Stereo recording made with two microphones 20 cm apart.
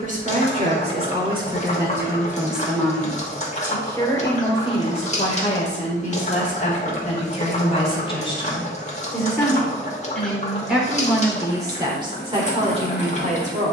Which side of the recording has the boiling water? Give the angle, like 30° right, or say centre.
40° left.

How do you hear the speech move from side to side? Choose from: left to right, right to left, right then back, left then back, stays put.
left then back.